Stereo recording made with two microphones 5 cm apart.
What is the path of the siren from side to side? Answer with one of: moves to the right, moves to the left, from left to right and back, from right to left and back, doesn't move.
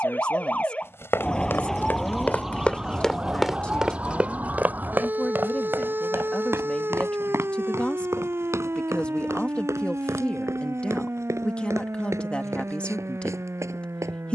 moves to the right.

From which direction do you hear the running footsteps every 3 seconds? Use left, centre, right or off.
left, right, right, right, right.